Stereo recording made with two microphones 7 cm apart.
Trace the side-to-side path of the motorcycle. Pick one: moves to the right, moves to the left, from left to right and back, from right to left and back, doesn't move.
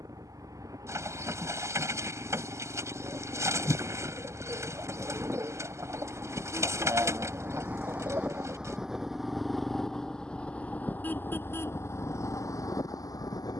moves to the left.